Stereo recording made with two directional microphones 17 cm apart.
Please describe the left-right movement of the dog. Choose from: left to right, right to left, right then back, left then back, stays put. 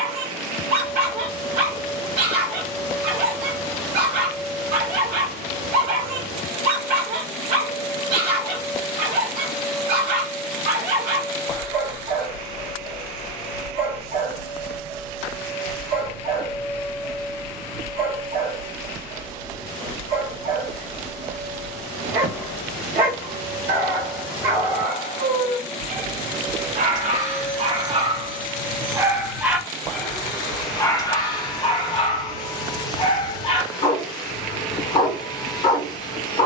right to left.